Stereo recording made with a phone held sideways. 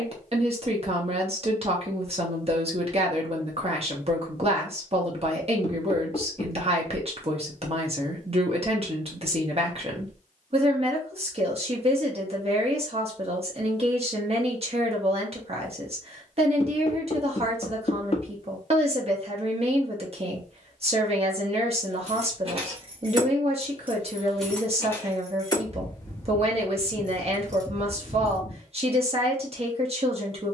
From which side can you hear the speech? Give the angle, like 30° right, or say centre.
50° right.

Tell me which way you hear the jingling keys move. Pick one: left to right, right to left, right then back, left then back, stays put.
left then back.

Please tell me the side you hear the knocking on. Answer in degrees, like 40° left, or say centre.
40° left.